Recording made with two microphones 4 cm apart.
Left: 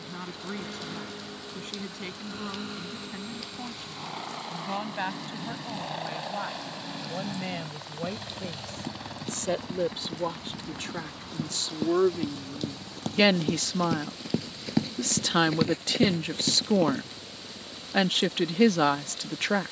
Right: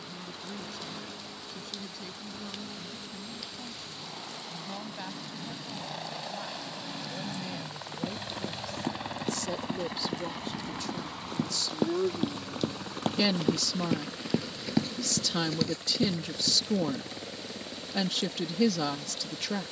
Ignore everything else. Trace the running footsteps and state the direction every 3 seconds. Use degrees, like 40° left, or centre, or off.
off, off, 60° right, 50° right, 20° right, 40° left, off.